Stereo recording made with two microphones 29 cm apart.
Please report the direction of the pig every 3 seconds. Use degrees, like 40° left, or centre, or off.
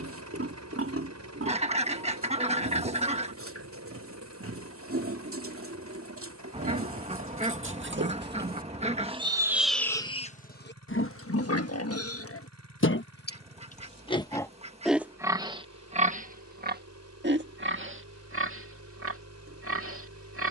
50° right, 50° right, 50° right, 30° left, 30° left, 30° right, 50° right.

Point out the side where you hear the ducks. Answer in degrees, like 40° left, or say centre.
20° right.